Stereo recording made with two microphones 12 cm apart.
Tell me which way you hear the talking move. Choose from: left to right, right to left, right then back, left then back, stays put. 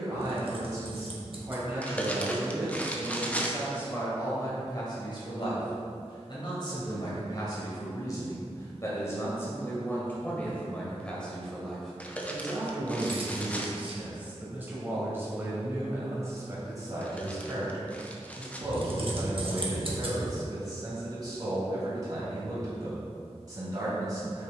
left then back.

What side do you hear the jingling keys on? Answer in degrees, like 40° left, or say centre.
50° right.